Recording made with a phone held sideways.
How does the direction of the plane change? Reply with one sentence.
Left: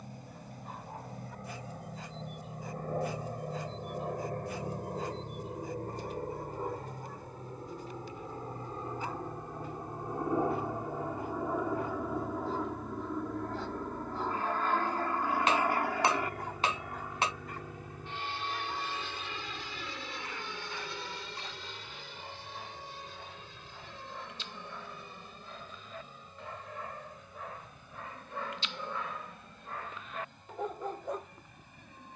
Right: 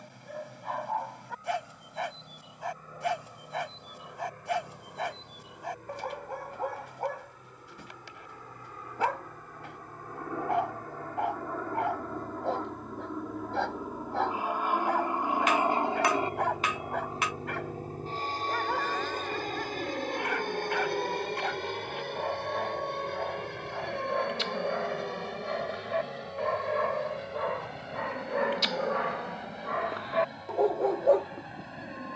You can hear the plane travel towards the right.